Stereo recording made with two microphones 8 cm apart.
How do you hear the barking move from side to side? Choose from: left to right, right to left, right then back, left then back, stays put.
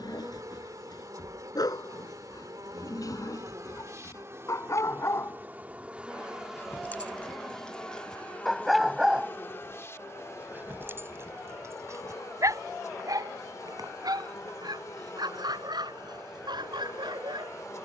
left to right.